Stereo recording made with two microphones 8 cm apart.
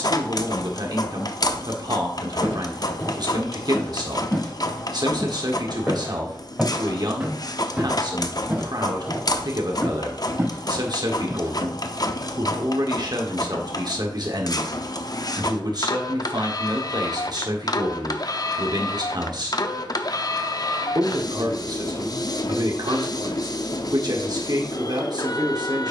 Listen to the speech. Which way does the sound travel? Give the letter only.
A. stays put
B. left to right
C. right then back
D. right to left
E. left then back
A.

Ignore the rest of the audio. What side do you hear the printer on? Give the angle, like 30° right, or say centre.
50° left.